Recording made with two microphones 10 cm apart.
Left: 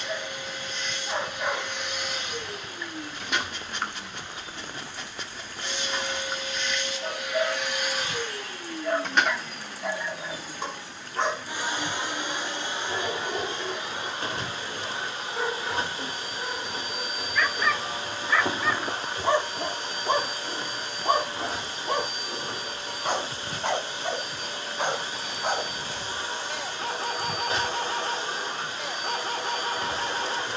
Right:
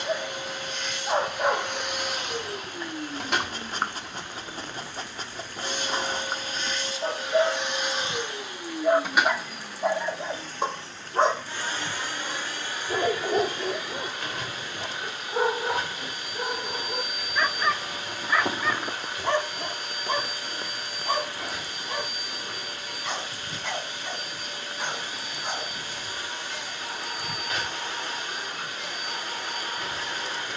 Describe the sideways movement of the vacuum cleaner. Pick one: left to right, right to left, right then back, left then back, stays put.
right to left.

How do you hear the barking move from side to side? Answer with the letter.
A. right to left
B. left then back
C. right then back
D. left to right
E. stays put
A.